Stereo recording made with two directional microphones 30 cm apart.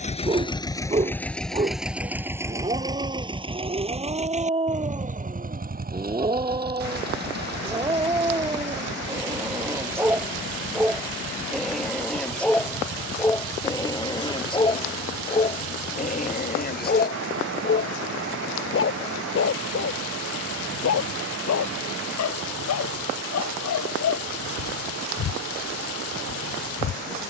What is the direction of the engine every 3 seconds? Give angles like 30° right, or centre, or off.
centre, 20° right, 30° right, 40° right, 40° right, 50° right, 50° right, 50° right, 50° right.